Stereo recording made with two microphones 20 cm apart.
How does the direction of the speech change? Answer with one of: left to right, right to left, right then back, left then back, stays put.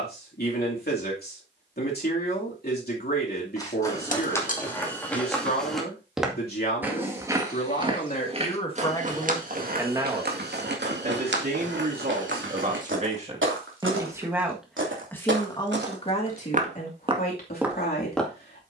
right then back.